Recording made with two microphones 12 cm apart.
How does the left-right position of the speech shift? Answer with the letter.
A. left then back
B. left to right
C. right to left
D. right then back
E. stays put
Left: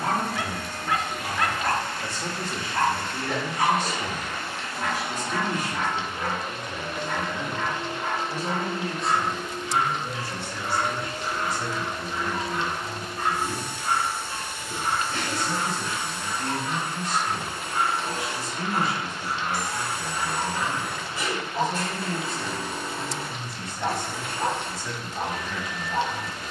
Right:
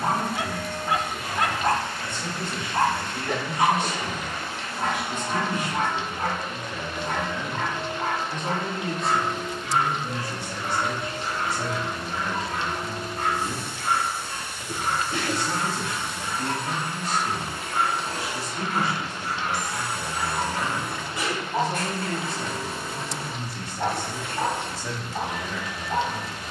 B.